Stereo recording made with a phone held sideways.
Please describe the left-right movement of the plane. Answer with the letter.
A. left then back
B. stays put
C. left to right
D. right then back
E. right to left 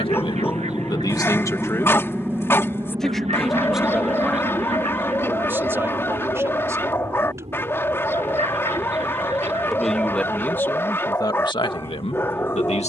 C.